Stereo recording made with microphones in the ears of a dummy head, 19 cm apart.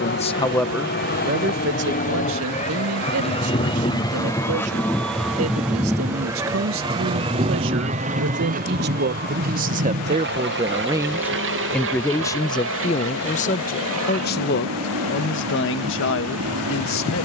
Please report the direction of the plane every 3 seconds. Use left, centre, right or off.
left, centre, right, right, right, right.